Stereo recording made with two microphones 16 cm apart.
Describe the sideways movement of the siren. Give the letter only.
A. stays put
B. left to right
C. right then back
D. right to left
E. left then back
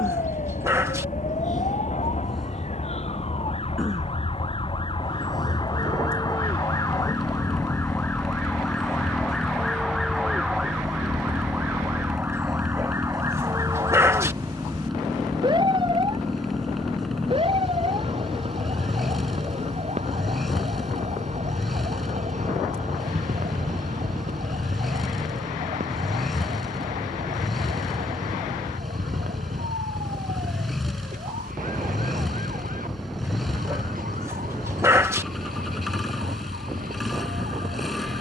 B.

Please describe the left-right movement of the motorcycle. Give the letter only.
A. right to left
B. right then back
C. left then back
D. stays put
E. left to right
D.